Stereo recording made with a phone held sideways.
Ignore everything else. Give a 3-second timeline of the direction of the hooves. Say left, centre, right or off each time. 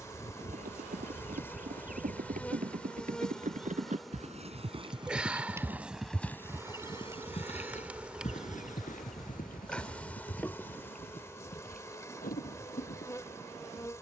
right, right, left, left, left.